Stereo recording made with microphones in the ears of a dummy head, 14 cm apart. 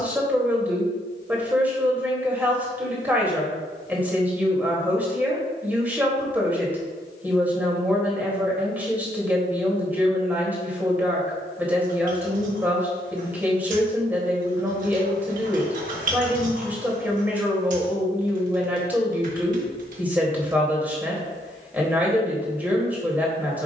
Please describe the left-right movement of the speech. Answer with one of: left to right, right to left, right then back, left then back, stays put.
stays put.